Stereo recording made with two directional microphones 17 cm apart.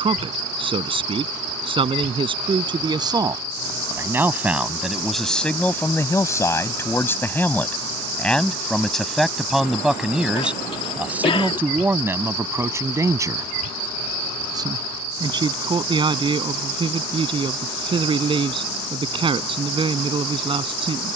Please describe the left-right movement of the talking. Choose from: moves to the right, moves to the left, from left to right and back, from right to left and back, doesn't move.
from right to left and back.